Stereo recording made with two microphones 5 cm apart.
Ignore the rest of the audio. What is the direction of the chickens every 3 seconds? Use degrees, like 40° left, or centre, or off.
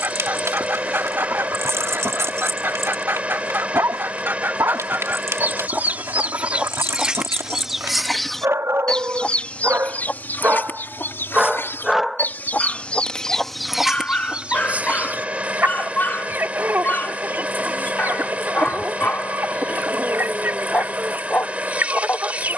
50° right, 50° right, 10° right, 40° left, centre, 50° right, 50° right, 50° right.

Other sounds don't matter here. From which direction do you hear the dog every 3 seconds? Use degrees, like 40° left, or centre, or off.
80° right, 80° right, 80° right, 40° right, 20° left, 40° left, 40° left, 40° left.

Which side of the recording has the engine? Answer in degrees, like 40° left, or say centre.
30° right.